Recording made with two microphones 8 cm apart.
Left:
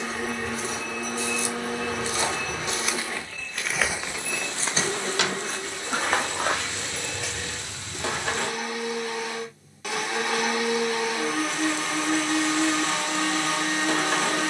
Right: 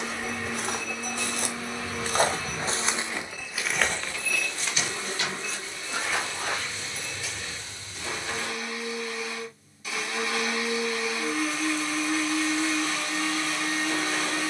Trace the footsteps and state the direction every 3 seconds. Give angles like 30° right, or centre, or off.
50° right, 20° left, 70° left, off, off.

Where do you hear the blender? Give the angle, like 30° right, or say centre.
70° left.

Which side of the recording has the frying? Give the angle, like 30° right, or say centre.
70° left.